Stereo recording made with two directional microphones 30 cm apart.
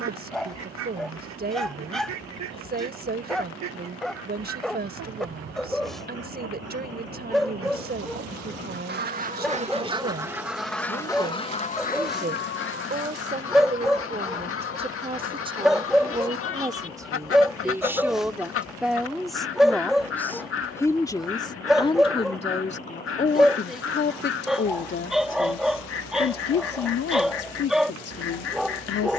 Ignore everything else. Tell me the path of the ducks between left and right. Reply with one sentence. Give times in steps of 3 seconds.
In this clip you hear the ducks on the right from 0 s, in the centre from 9 s and on the left from 12 s.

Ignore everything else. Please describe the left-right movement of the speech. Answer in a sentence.
In this clip you hear the speech go from the right side to the left.